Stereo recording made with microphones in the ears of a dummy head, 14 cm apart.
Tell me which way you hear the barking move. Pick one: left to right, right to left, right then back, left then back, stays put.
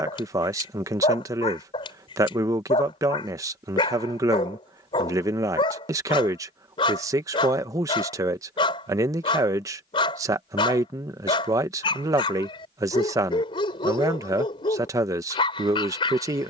stays put.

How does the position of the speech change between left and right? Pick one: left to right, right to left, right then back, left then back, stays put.
stays put.